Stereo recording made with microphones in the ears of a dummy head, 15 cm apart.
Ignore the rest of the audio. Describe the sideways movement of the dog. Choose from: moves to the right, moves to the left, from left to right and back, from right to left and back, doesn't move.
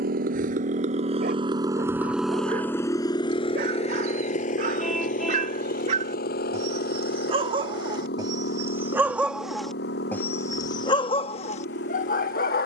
moves to the left.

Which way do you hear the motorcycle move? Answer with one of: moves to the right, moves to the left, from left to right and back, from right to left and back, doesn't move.
moves to the left.